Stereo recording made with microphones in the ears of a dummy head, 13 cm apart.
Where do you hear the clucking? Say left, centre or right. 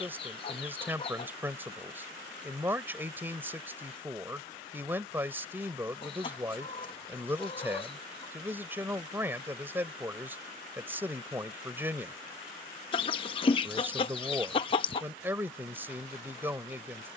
left.